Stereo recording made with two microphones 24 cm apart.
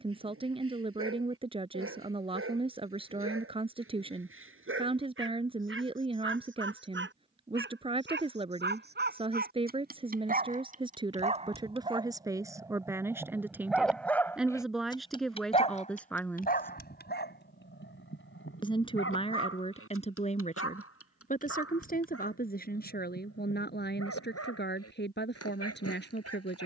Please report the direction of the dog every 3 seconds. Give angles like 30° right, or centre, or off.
60° right, 60° right, 50° right, 30° right, centre, 40° left, 60° left, 70° left, 80° left.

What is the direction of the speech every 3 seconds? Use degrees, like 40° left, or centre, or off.
20° right, 20° right, 20° right, 20° right, 10° right, centre, 30° left, 40° left, 50° left.